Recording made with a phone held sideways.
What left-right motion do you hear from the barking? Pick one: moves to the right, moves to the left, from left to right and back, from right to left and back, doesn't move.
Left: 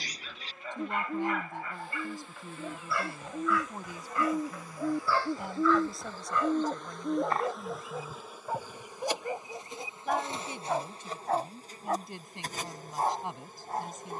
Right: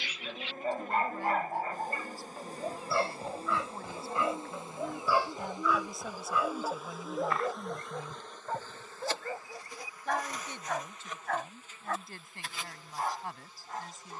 moves to the left.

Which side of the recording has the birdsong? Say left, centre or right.
left.